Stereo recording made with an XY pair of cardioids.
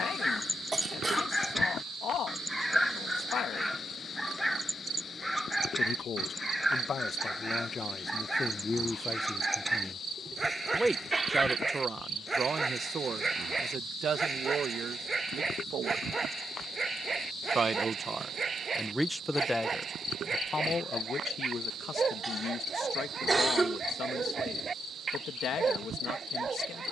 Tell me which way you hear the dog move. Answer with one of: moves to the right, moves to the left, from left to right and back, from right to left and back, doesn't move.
moves to the right.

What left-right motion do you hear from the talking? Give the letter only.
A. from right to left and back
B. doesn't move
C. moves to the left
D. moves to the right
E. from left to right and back
E.